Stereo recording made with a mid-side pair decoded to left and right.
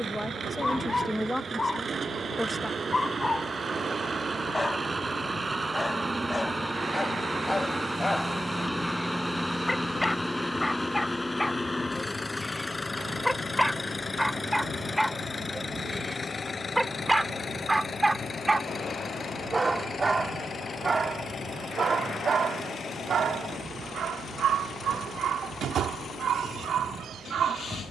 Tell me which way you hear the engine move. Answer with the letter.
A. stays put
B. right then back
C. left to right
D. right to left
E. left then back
D.